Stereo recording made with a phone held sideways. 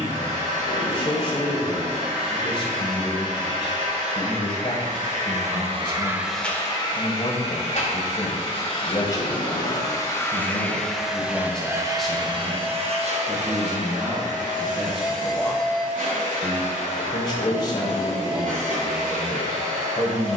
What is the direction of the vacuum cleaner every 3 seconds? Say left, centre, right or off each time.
right, right, left, centre, right, right, right.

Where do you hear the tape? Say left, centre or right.
left.